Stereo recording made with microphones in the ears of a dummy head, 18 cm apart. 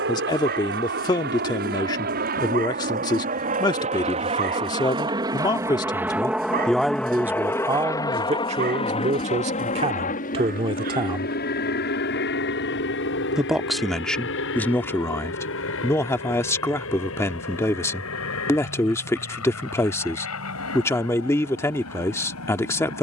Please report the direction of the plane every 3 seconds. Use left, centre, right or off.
right, right, centre, left, left, left, left, left.